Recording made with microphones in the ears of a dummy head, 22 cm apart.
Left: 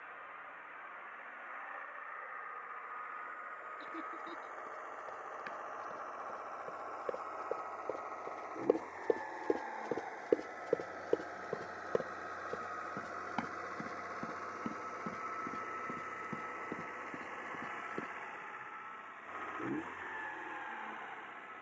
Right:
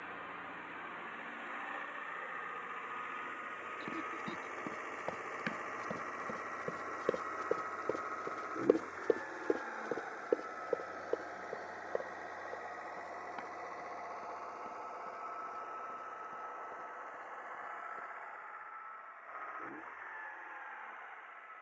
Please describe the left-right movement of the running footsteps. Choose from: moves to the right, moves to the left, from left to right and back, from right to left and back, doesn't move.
moves to the left.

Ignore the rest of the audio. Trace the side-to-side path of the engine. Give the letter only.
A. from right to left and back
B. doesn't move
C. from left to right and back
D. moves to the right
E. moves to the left
E.